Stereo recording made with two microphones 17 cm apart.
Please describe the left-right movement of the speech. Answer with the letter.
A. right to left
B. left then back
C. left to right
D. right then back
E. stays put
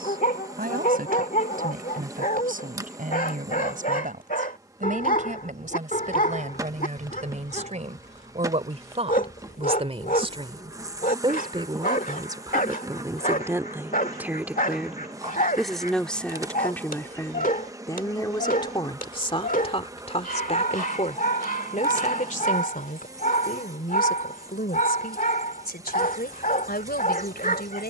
A.